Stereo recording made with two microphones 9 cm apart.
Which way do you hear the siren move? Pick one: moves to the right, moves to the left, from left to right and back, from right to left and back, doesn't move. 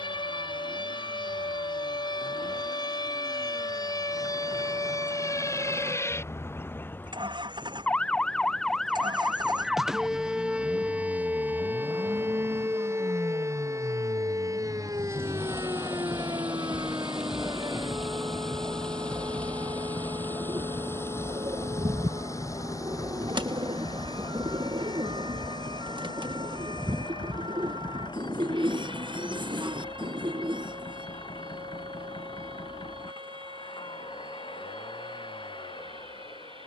moves to the right.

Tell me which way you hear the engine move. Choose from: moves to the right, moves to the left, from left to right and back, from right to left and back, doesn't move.
moves to the left.